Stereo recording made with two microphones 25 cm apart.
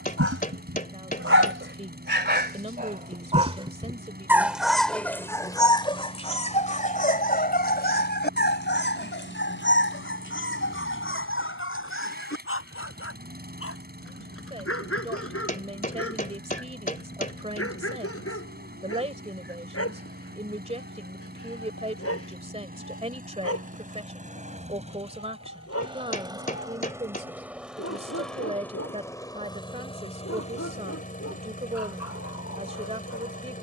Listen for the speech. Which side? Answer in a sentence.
In this clip you hear the speech on the right.